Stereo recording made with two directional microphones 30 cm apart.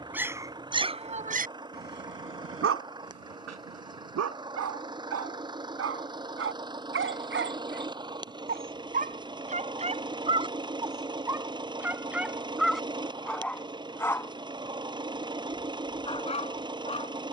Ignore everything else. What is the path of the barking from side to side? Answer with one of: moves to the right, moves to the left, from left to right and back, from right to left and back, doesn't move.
from left to right and back.